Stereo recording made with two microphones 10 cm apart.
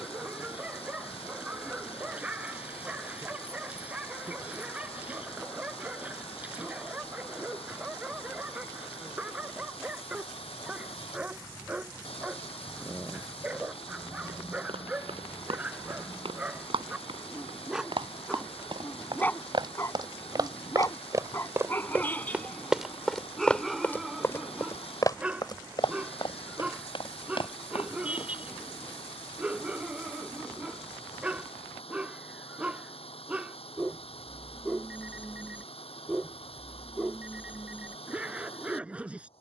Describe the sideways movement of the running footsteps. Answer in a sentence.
You can hear the running footsteps go from the right side to the left.